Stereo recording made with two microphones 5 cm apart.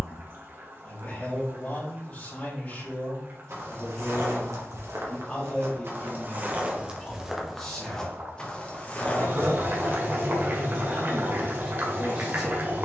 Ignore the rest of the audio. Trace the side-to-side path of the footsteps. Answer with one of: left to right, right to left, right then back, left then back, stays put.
right to left.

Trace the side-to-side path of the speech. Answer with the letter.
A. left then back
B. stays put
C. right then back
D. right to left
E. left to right
E.